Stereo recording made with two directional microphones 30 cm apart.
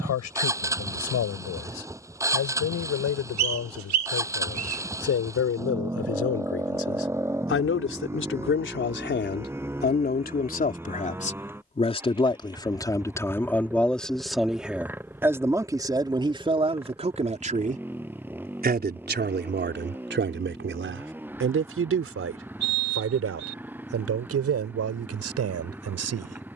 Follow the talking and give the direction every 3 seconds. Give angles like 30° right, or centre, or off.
60° left, 60° left, 40° left, 30° left, 10° left, 20° right, 40° right, 50° right, 60° right.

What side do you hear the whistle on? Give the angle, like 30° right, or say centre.
70° right.